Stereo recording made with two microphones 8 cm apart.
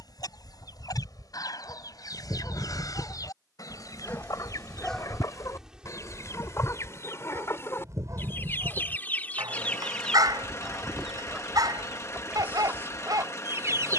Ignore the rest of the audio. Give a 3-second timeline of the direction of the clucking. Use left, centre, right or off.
left, left, left, centre, right.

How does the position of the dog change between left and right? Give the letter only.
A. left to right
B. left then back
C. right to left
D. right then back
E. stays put
A.